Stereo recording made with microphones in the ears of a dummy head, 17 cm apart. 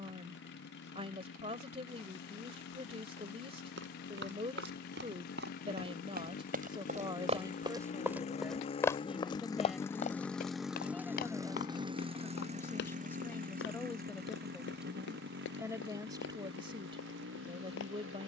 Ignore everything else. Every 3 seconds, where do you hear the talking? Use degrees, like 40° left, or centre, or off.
30° right, 30° right, 20° right, centre, 10° left, 30° right.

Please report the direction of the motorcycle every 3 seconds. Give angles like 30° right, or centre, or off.
70° left, 60° left, 50° left, centre, 50° right, 70° right.